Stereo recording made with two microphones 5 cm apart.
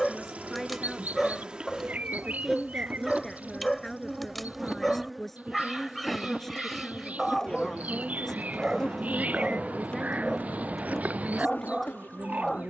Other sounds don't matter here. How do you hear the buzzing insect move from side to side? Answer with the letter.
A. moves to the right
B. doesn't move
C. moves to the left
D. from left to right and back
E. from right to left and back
C.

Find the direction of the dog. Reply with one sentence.
You can hear the dog in the centre.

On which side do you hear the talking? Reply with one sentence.
In this clip you hear the talking in the centre.